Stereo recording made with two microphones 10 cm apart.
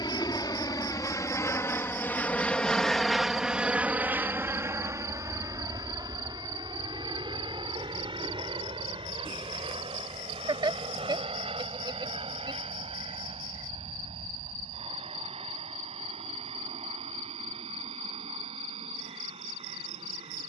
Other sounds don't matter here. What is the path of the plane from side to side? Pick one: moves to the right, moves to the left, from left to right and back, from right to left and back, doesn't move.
moves to the right.